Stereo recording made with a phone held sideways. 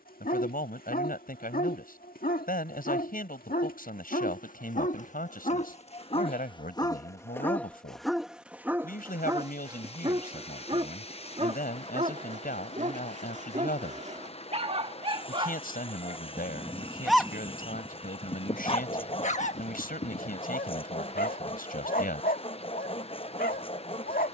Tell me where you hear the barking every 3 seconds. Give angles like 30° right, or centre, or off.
70° left, 60° left, 10° left, 30° right, 50° right, 10° right, 50° left, 70° left.